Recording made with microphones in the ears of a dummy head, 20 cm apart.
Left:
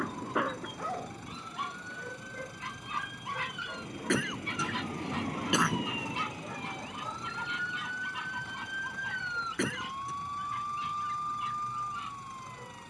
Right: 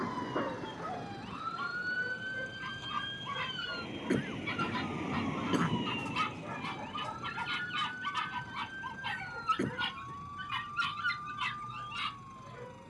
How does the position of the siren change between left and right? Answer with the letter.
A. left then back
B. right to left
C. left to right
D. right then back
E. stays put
B.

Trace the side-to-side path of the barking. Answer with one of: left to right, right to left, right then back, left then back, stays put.
left to right.